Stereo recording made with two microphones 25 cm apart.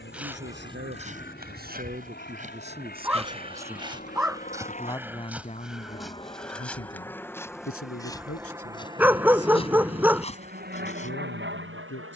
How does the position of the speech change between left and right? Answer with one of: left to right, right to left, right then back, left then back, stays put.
right to left.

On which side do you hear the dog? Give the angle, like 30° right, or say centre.
10° right.